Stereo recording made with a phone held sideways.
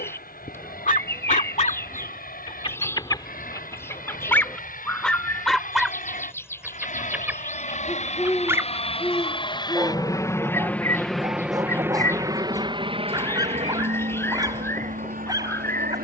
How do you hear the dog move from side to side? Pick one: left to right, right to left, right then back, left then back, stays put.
left to right.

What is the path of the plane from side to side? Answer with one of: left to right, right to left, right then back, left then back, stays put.
left to right.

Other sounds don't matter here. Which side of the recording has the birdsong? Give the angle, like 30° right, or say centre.
10° left.